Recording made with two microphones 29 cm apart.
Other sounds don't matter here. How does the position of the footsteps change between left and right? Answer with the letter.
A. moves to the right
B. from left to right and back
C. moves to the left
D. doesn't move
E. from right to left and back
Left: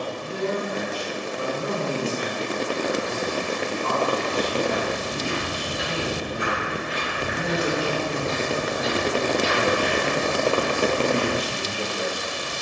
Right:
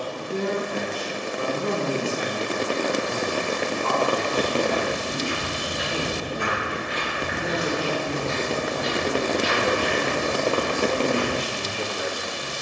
E.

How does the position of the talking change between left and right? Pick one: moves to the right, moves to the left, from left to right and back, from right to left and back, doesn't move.
moves to the left.